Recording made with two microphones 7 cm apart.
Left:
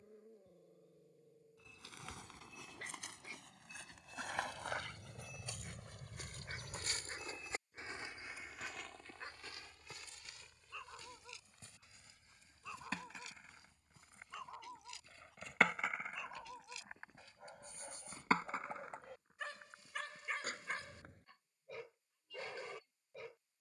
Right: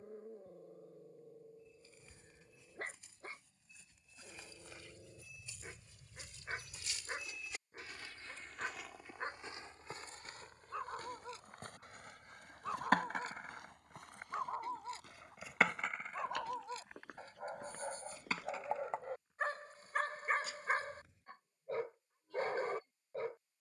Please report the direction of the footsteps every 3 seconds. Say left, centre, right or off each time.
left, left, left, right, right, right, right, off.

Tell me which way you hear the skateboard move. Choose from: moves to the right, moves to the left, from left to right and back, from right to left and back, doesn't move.
moves to the left.